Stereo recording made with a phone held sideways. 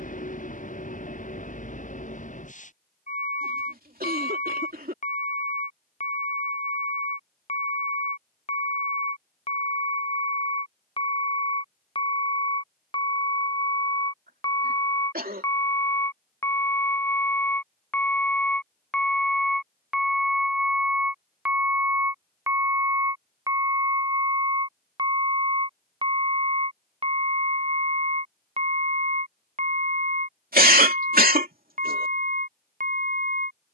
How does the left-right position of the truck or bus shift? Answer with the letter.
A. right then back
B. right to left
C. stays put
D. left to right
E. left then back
D.